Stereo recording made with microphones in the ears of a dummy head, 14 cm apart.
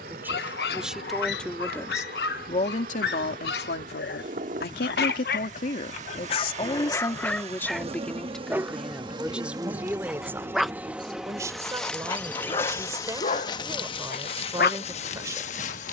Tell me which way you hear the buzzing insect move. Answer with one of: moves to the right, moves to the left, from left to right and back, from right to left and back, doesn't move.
moves to the left.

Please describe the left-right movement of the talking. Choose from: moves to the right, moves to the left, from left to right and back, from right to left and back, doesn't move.
from right to left and back.